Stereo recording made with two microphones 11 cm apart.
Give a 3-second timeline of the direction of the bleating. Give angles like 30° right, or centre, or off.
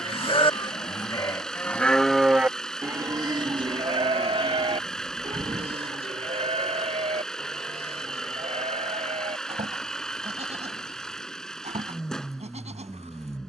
20° left, 50° right, 70° right, 80° right, 80° right.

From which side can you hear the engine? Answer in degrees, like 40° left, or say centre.
10° left.